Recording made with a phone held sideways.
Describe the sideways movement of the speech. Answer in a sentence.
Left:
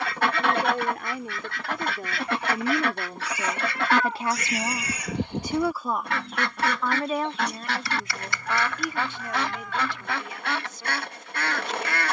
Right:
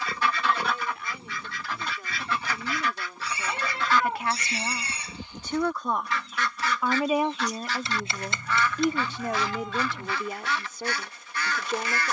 In this clip you hear the speech move from left to right.